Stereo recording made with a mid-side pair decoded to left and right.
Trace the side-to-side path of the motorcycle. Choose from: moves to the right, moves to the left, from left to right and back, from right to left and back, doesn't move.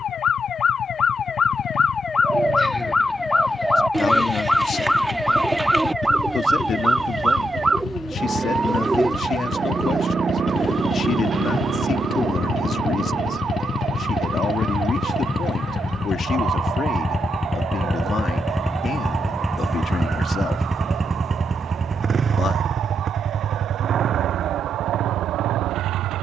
moves to the right.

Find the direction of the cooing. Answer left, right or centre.
centre.